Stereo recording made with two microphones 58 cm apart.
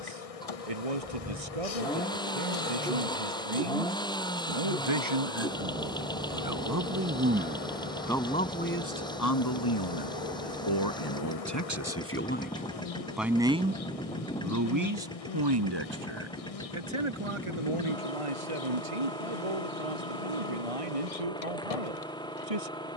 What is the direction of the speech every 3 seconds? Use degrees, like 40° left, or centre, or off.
70° right, 60° right, 10° right, 40° left, 10° right, 50° right, 70° right, 70° right.